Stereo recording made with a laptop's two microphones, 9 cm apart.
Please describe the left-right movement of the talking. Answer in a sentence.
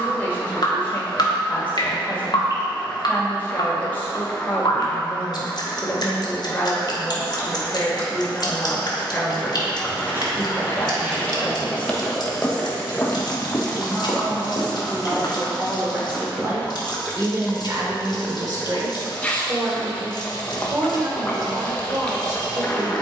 You can hear the talking travel towards the right.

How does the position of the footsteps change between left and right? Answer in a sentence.
In this clip you hear the footsteps travel towards the left.